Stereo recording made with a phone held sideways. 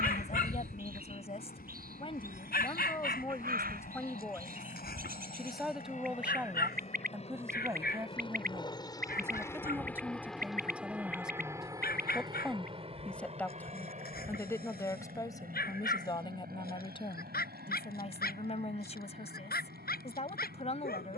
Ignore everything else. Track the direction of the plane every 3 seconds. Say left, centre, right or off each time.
left, left, left, centre, right, right, right.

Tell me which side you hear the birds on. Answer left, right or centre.
right.